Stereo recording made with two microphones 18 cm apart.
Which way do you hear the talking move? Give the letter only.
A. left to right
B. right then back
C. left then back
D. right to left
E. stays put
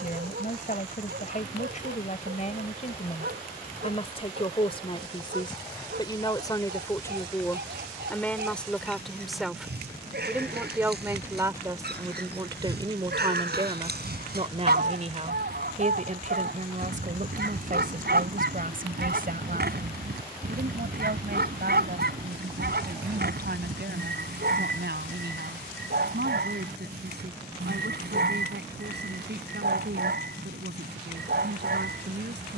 A.